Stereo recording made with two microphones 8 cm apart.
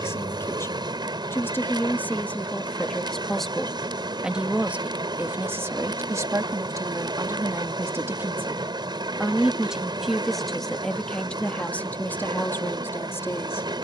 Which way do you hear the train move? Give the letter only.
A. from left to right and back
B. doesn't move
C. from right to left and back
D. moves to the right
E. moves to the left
B.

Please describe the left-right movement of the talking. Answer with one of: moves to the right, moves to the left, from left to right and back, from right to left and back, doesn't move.
from left to right and back.